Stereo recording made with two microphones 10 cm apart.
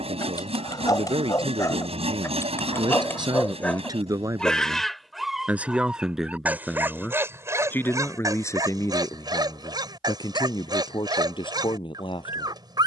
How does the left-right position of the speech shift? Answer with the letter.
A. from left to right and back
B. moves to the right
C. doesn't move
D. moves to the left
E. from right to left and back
D.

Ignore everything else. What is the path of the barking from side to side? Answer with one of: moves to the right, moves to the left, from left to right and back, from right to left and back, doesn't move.
moves to the right.